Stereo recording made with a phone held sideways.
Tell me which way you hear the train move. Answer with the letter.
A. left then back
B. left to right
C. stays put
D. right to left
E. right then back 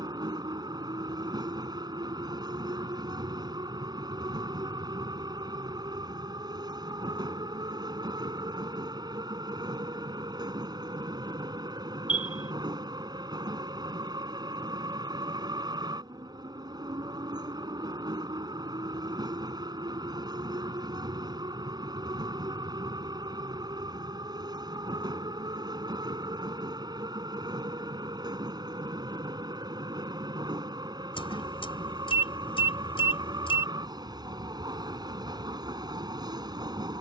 C.